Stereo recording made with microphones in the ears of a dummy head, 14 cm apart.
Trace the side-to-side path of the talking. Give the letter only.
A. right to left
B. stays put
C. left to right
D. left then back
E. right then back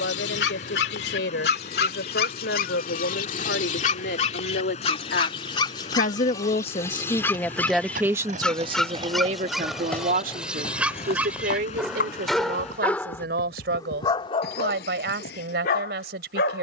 C.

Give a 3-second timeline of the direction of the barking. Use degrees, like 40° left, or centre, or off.
70° left, 40° left, 10° left, centre, 20° left, 70° left.